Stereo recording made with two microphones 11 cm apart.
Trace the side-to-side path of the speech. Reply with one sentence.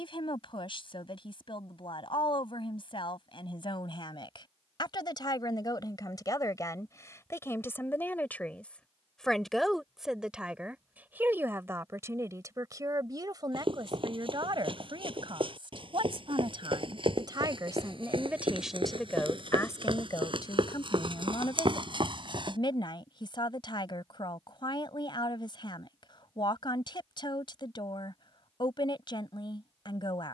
You can hear the speech move from left to right and back again.